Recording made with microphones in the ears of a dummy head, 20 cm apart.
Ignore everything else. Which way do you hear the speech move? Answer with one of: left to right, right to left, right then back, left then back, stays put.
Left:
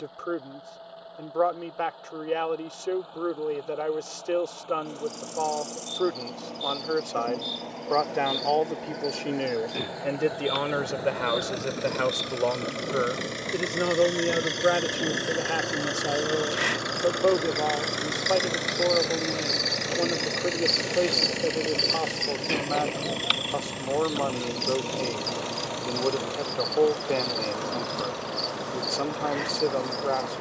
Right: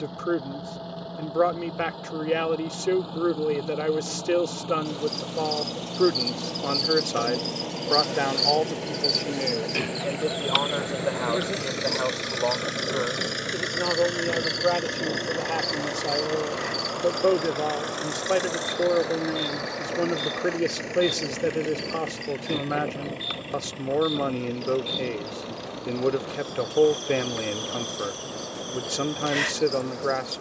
left then back.